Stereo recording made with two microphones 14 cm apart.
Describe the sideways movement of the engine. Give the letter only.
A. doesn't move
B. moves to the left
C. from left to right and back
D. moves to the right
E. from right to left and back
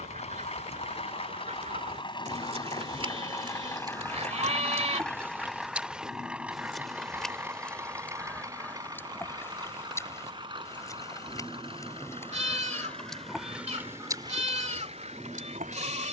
D.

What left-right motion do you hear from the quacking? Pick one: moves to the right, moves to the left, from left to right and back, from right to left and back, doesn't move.
from right to left and back.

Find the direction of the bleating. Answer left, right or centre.
right.